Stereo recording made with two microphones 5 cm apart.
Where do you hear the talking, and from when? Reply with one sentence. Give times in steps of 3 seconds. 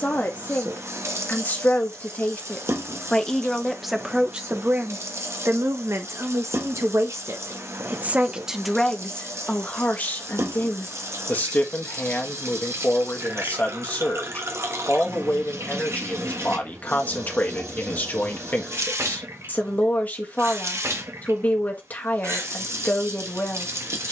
In this clip you hear the talking on the left from 0 s, on the right from 3 s and on the left from 9 s.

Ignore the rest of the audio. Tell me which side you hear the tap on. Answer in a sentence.
In this clip you hear the tap on the right.